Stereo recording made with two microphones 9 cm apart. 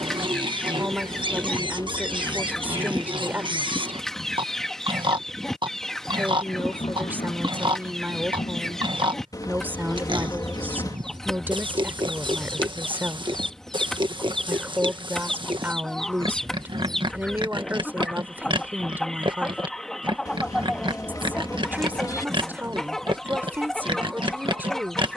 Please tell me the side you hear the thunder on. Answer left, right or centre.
left.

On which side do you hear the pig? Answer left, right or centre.
right.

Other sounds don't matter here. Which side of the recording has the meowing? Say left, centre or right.
left.